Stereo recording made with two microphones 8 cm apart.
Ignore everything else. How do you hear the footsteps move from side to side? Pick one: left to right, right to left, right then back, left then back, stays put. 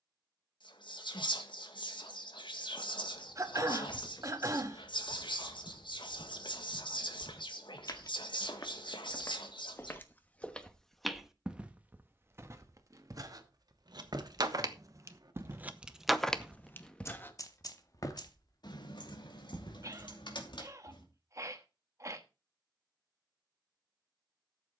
right then back.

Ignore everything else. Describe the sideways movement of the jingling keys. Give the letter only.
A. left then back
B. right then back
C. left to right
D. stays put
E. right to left
E.